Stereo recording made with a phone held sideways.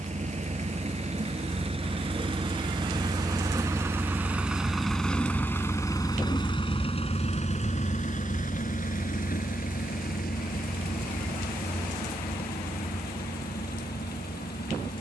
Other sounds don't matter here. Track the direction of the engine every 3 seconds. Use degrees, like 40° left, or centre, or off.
40° right, centre, 40° left, 70° left, 80° left.